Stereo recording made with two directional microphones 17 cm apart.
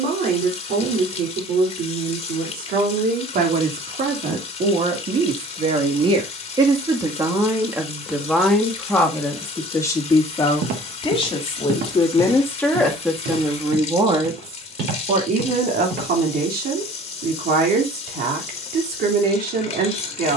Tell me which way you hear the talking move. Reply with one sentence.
You can hear the talking go left and come back.